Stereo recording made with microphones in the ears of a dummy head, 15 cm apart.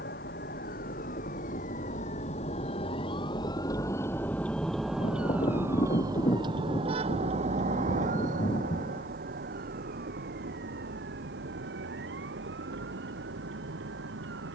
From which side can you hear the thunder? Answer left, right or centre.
left.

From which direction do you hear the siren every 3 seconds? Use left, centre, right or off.
left, centre, right, right, right.